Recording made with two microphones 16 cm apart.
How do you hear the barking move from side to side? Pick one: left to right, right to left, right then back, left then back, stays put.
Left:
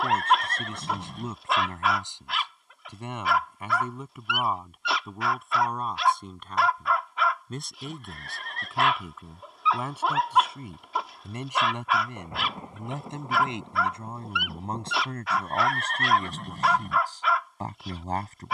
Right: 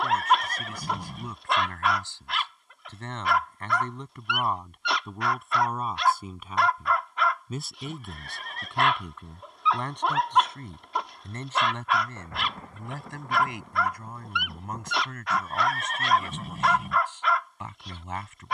stays put.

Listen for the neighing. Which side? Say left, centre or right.
centre.